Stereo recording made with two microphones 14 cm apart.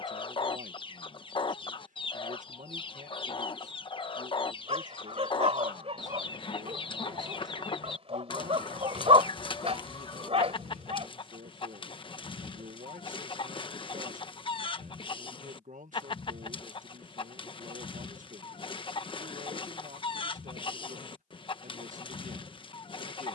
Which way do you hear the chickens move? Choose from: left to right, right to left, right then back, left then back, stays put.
stays put.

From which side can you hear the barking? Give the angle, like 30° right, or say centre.
50° right.